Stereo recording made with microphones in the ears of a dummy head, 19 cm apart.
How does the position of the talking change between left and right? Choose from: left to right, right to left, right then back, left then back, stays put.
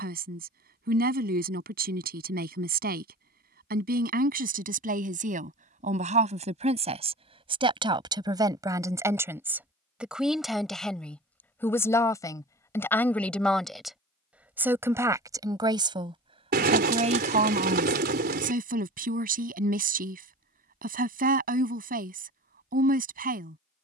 left then back.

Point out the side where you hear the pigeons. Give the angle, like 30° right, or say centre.
50° right.